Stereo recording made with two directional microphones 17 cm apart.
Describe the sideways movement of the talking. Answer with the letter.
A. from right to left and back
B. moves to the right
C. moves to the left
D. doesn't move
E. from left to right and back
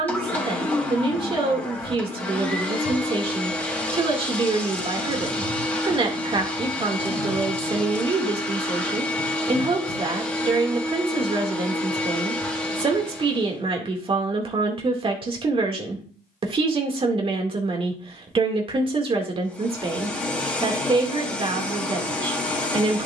D.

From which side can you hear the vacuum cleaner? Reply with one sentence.
In this clip you hear the vacuum cleaner in the centre.